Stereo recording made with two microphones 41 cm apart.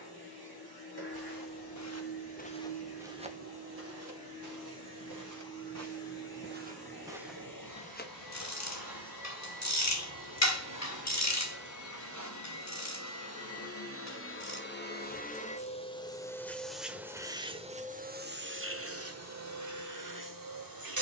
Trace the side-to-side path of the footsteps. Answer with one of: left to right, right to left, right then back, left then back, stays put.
right then back.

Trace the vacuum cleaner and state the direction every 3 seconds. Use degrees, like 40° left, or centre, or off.
60° left, 60° left, 60° left, 50° left, 30° left, centre, 40° right.